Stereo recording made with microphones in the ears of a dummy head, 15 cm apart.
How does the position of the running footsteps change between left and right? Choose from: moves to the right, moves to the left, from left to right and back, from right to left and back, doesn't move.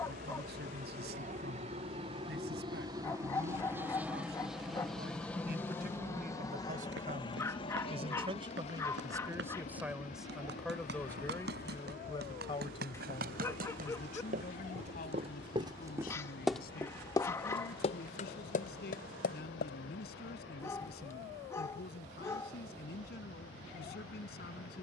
moves to the left.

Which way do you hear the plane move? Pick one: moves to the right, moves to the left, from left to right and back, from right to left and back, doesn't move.
moves to the left.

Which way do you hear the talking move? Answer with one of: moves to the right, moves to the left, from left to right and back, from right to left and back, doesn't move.
moves to the left.